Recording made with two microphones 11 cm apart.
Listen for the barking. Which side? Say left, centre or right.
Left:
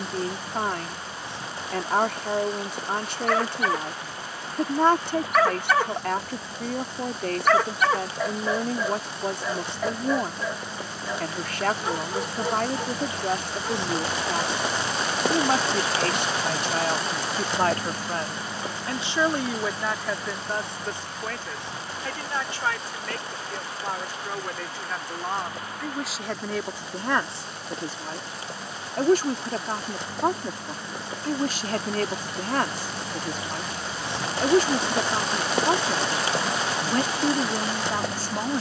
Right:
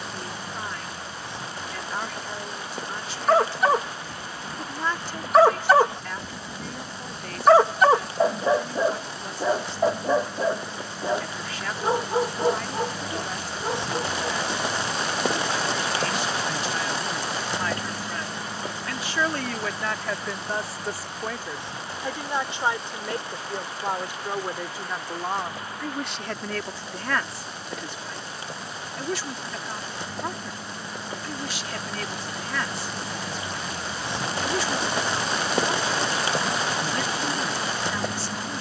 right.